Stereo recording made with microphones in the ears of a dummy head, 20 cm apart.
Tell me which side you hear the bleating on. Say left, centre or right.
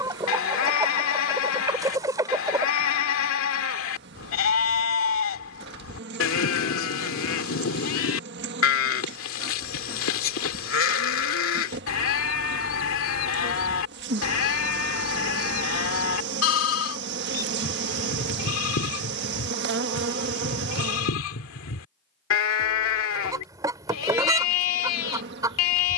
left.